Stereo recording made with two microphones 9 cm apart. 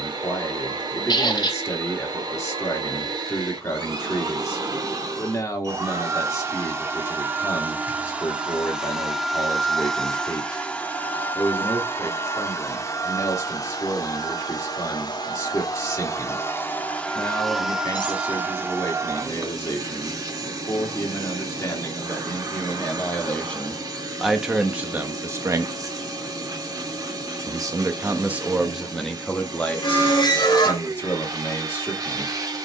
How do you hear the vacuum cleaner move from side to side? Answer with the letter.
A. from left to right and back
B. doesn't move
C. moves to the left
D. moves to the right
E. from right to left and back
E.